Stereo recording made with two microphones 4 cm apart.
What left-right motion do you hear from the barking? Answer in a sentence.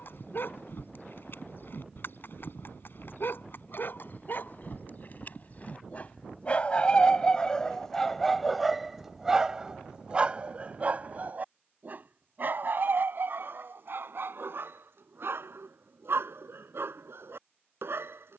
In this clip you hear the barking travel towards the right.